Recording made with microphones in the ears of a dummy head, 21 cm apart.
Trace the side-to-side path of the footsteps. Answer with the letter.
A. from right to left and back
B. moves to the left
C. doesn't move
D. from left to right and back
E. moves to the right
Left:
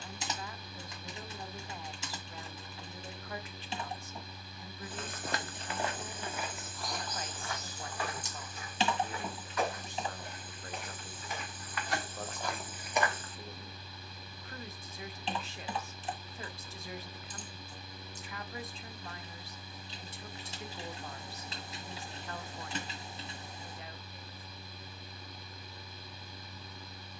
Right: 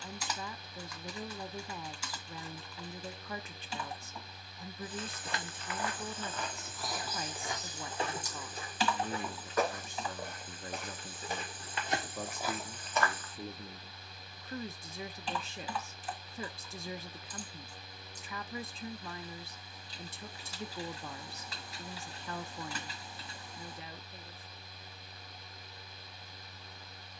D.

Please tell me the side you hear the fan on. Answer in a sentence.
In this clip you hear the fan on the left.